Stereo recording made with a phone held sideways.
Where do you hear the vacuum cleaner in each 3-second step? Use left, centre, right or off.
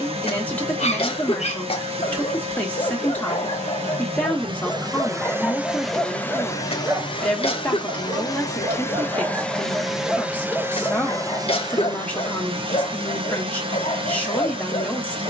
right, right, left, centre, right.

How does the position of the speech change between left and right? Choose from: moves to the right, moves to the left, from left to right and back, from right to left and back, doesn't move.
doesn't move.